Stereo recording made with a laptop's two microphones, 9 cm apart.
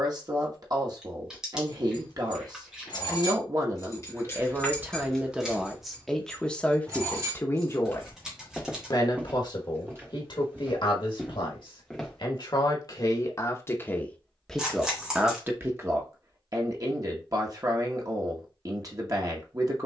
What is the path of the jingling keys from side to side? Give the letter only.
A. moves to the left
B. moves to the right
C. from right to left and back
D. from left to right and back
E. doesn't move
B.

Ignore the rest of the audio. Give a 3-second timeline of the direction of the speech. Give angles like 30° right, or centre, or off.
40° right, 20° right, 20° left, 60° left, 30° left, 30° right, 40° right.